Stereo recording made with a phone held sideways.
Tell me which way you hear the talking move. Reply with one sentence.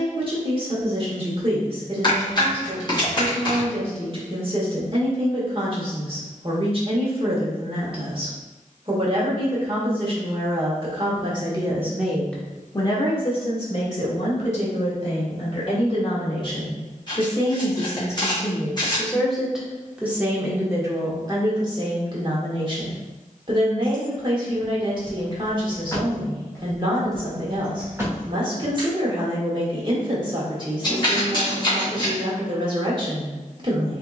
You can hear the talking go left and come back.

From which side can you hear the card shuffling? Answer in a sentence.
You can hear the card shuffling on the left.